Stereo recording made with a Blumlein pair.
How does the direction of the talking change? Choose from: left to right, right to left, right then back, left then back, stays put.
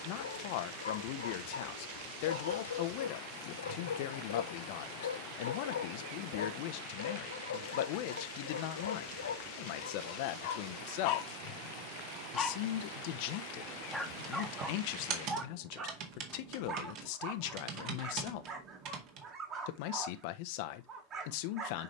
stays put.